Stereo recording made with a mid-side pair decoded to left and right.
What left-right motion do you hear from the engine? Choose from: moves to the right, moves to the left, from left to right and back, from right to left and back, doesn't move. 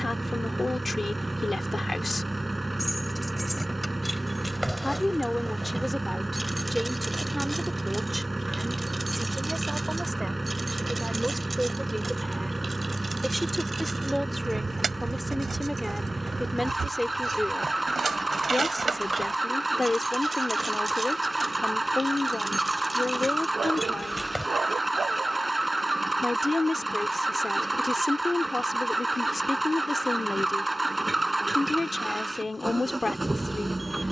doesn't move.